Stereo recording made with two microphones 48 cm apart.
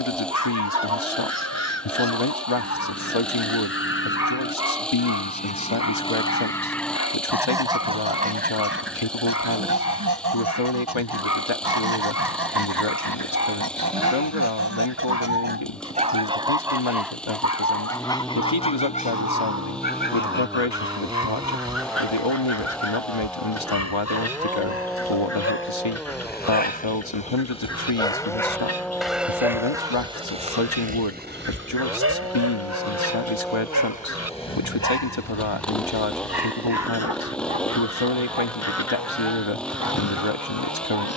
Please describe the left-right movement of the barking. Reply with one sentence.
In this clip you hear the barking go from the left side to the right.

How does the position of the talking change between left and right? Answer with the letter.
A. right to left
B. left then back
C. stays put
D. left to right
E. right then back
C.